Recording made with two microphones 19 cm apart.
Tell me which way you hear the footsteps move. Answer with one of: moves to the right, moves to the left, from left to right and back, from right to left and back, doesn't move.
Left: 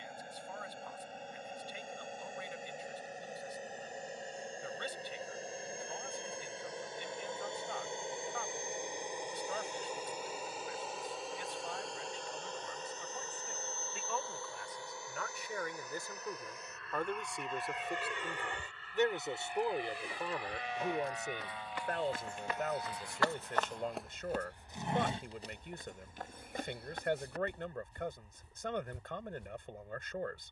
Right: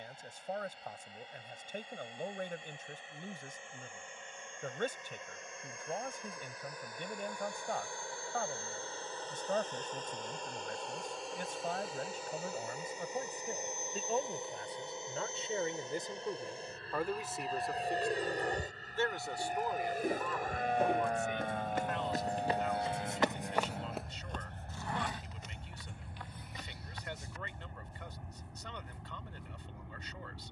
moves to the left.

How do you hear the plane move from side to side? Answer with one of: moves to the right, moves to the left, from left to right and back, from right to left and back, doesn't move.
moves to the right.